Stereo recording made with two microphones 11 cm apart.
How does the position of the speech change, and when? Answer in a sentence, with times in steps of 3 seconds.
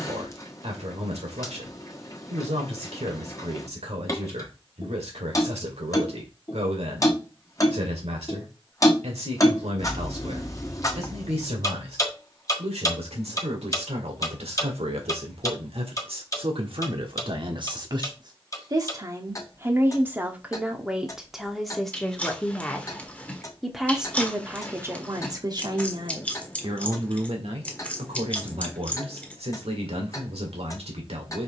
In this clip you hear the speech on the right from 0 s, in the centre from 21 s and on the right from 24 s.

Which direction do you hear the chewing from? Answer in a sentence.
You can hear the chewing in the centre.